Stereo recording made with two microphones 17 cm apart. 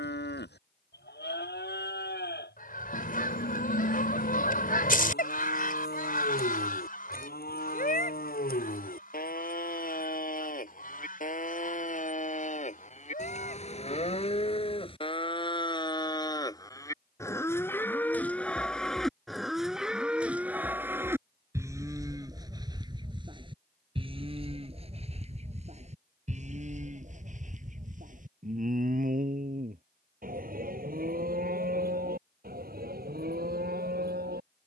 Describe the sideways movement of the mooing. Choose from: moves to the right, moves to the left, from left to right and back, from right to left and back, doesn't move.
moves to the right.